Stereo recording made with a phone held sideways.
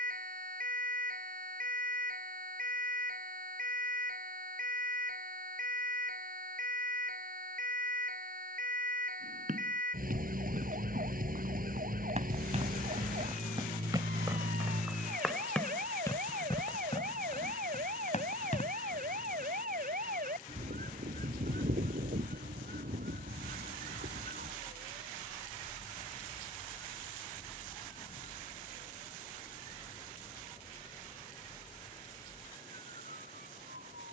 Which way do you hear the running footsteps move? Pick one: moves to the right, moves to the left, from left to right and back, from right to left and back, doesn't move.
moves to the left.